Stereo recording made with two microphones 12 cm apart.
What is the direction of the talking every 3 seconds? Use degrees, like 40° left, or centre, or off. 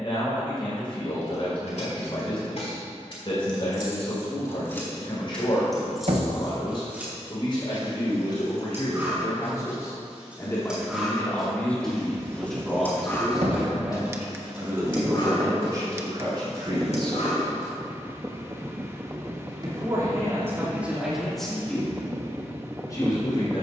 50° left, 50° left, 40° left, 20° left, 10° right, 40° right, 20° right, 20° left.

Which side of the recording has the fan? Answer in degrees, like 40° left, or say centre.
20° right.